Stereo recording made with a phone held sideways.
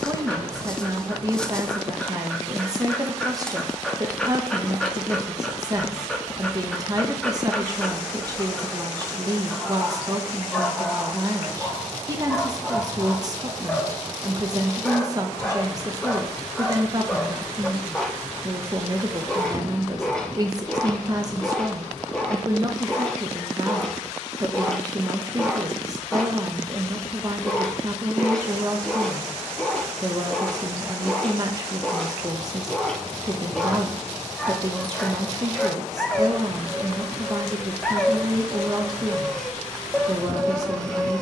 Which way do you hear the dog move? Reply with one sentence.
You can hear the dog stay in one place.